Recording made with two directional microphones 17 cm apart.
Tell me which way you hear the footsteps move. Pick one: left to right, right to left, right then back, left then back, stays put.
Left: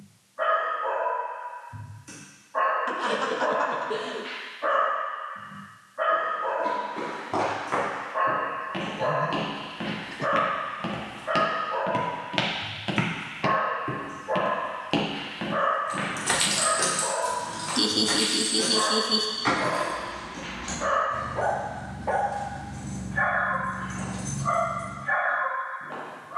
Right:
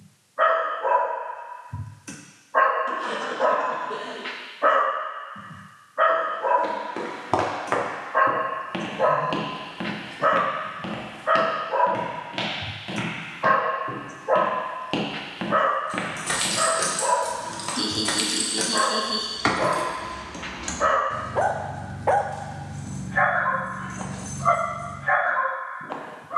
left then back.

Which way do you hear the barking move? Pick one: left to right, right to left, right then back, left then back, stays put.
stays put.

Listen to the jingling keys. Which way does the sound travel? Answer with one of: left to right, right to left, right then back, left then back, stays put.
right then back.